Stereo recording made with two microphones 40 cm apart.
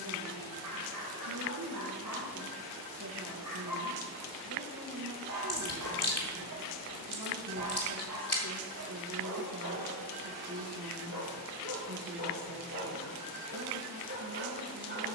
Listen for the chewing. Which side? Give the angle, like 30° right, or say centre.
40° left.